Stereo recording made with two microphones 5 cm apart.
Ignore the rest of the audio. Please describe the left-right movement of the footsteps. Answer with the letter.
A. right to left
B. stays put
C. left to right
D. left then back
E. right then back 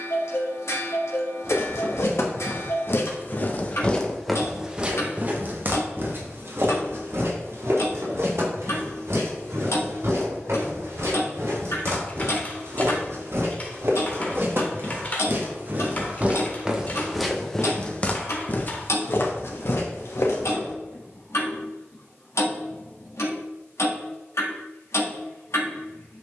E.